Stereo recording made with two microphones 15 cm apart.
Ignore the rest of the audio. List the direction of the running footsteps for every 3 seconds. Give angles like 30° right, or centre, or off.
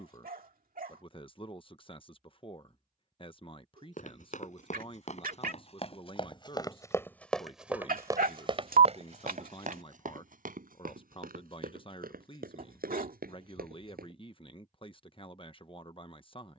off, 50° left, centre, 70° right, 80° right, off.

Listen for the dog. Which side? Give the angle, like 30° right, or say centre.
70° right.